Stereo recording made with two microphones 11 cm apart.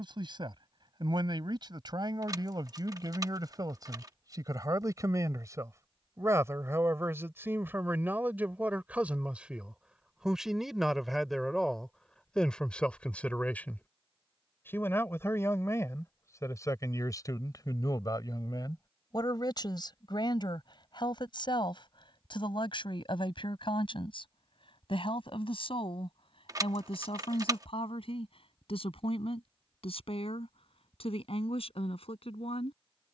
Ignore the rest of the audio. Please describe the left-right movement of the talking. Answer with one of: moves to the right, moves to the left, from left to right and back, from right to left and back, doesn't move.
moves to the left.